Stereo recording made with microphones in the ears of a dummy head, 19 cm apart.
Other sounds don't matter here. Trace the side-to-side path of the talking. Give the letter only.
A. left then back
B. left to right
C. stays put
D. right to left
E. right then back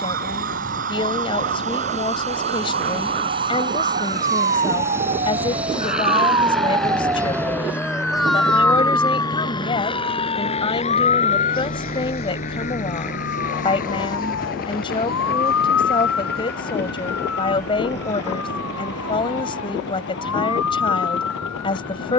C.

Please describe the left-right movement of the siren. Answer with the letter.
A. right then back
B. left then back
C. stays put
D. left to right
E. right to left
E.